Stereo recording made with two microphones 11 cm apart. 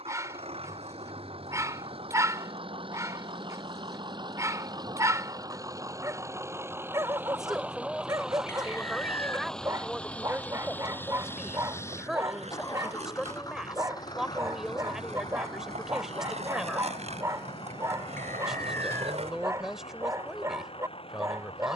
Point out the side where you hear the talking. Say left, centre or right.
centre.